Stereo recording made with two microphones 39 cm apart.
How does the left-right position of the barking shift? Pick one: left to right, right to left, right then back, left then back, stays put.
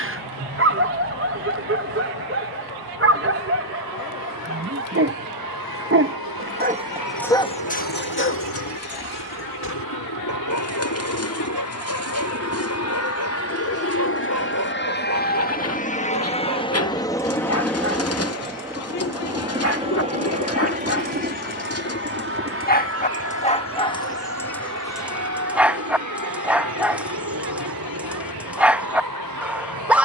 left then back.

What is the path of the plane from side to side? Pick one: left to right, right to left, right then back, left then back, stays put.
left to right.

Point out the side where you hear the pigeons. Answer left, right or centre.
left.